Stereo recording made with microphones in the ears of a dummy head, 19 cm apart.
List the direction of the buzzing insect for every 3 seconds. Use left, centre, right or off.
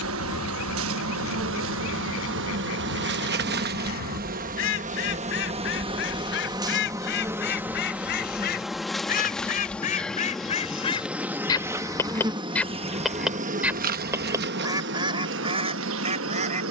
right, right, centre, centre, right, right.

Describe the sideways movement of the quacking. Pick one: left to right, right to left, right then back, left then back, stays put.
left to right.